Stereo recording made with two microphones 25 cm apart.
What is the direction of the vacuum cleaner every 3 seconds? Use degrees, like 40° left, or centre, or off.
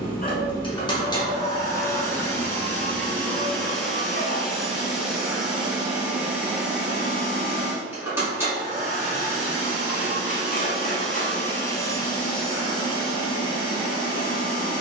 10° left, centre, 10° right, centre, 20° left.